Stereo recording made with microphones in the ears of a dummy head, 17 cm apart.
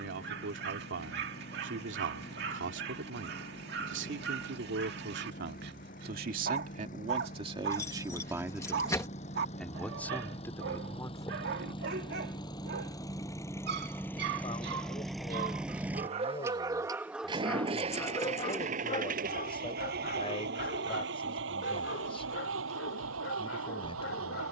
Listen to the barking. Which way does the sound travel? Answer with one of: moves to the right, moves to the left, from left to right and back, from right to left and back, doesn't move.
moves to the left.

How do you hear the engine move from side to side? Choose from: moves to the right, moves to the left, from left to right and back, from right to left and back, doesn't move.
moves to the right.